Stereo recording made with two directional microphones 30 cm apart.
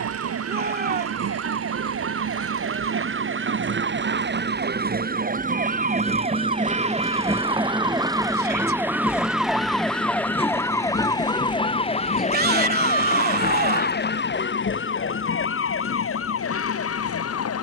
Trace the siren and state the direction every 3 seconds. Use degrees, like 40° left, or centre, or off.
50° right, 40° right, 20° right, 10° left, 30° left, 50° left.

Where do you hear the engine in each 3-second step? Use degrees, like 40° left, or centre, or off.
50° right, 30° right, 10° right, 20° left, 40° left, 50° left.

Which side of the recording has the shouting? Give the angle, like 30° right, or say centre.
30° right.